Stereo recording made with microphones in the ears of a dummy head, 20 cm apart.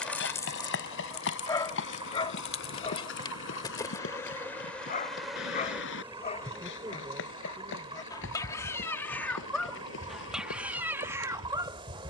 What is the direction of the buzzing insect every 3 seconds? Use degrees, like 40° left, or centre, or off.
20° left, 10° left, 20° right, 30° right.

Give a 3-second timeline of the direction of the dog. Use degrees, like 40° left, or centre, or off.
20° left, 30° left, 20° left, 10° right.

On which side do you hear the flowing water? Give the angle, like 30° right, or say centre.
20° right.